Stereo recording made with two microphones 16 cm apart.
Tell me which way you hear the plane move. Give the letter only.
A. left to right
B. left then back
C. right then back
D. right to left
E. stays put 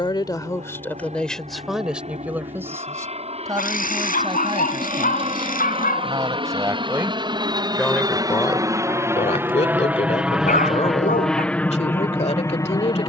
D.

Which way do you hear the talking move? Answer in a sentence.
In this clip you hear the talking move from left to right and back again.